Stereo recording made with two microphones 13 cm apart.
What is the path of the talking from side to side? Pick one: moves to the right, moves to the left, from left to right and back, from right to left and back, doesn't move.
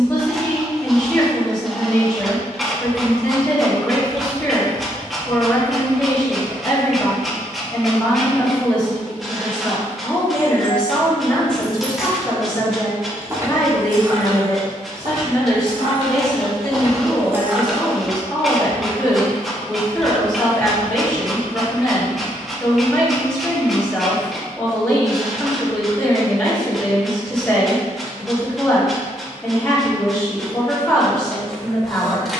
doesn't move.